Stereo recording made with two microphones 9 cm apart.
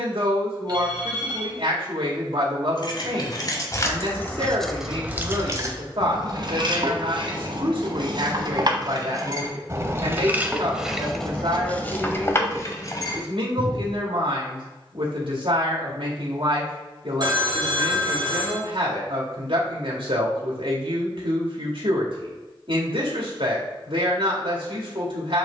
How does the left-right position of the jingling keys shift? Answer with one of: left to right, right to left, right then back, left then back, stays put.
right then back.